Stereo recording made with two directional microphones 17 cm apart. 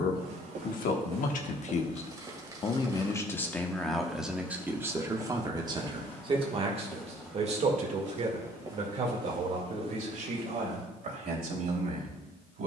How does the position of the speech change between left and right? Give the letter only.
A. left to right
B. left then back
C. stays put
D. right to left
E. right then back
A.